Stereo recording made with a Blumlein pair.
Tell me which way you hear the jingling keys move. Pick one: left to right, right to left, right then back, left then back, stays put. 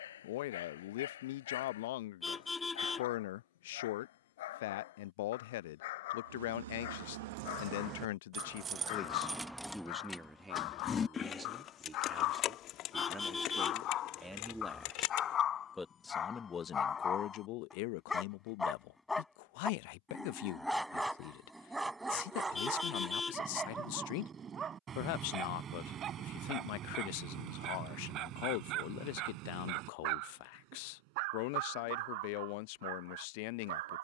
right to left.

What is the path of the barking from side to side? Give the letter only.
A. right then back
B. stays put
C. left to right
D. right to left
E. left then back
C.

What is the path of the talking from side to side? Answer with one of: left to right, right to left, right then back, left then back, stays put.
right then back.